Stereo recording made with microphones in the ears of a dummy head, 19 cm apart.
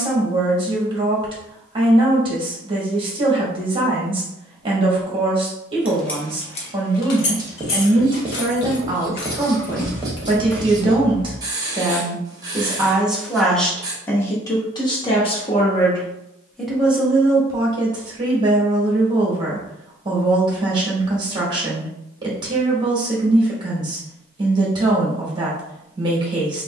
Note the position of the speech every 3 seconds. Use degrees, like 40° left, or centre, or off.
20° right, 20° right, 20° right, 20° right, centre, centre, 20° right, 20° right, 20° right.